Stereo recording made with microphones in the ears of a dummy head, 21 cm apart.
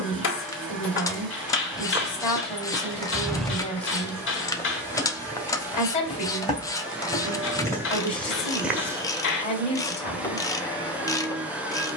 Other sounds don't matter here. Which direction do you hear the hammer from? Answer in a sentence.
In this clip you hear the hammer on the left.